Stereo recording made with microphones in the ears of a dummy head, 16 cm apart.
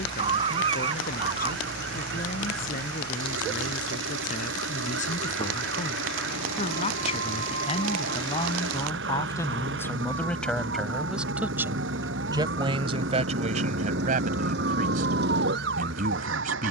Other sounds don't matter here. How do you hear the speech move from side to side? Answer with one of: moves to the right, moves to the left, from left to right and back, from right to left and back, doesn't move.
moves to the right.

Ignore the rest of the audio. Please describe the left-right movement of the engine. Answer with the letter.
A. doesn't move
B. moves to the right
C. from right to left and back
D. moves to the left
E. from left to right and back
A.